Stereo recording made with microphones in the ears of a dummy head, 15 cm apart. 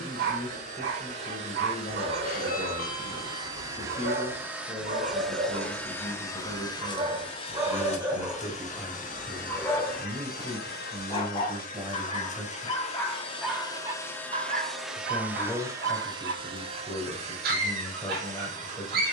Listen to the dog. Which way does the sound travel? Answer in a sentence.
In this clip you hear the dog go left and come back.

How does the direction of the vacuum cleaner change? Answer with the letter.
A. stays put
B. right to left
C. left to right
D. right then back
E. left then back
E.